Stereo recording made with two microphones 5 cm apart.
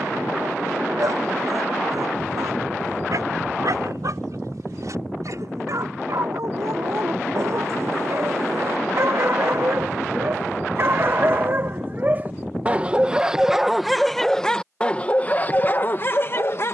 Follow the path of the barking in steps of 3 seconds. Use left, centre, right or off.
right, right, right, right, centre, left.